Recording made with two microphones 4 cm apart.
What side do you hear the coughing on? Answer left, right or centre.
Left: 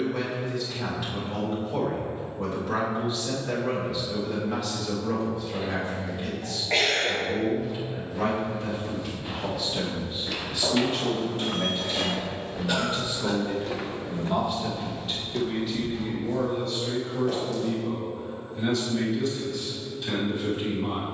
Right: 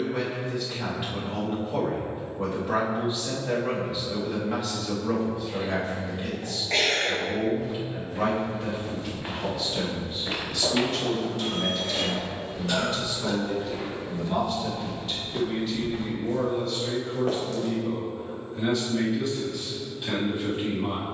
centre.